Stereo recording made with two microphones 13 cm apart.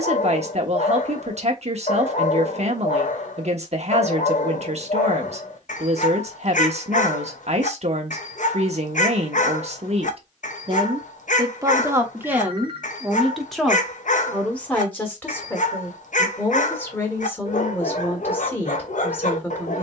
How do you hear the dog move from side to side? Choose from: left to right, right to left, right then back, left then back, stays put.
stays put.